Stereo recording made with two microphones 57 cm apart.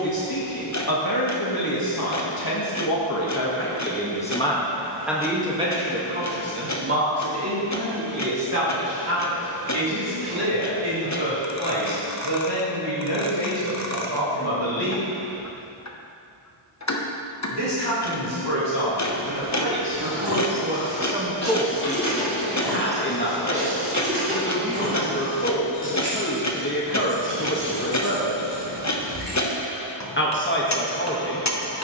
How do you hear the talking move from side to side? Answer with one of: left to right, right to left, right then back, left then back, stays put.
right then back.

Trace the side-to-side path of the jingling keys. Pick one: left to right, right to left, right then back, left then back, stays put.
left to right.